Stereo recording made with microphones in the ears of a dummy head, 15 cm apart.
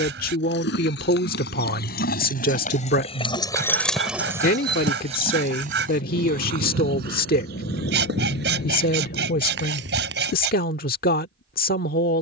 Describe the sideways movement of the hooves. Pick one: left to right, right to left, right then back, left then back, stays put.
left to right.